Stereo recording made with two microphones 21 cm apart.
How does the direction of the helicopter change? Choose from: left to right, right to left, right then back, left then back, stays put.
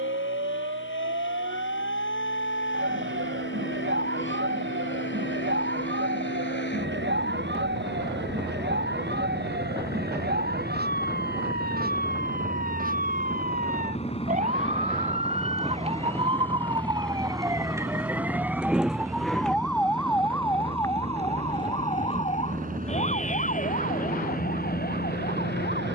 left to right.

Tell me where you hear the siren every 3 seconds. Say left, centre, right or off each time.
right, right, right, right, right, right, centre, left, left.